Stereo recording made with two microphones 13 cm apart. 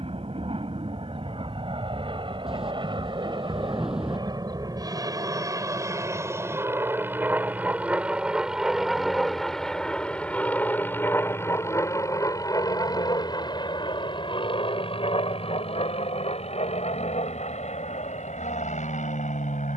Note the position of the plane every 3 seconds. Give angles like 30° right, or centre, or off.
50° right, 30° right, 10° right, 10° left, 30° left, 50° left, 50° left.